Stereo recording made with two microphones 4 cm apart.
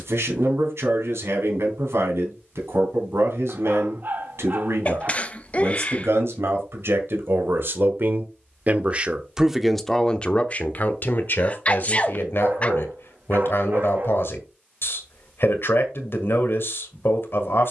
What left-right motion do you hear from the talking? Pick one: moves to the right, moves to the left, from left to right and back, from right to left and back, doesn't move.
moves to the left.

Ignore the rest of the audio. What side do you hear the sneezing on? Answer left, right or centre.
left.